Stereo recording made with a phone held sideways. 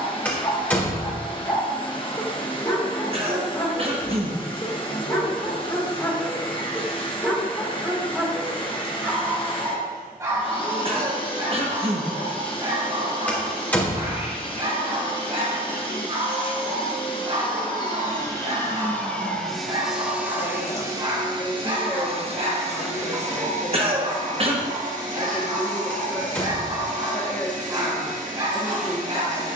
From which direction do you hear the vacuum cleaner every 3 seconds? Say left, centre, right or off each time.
left, left, left, left, left, left, centre, right, right, right.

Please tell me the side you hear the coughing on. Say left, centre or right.
right.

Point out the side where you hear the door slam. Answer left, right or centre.
centre.